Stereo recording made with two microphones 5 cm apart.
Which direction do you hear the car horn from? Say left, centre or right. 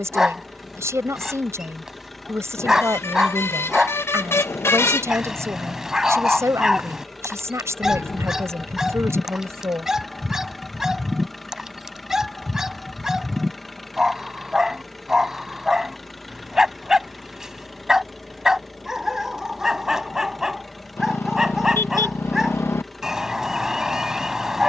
left.